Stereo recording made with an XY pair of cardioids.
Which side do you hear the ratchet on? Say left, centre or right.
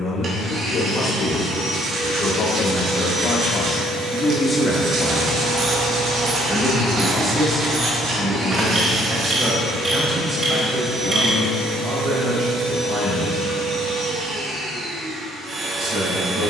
right.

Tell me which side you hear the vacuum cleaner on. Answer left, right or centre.
right.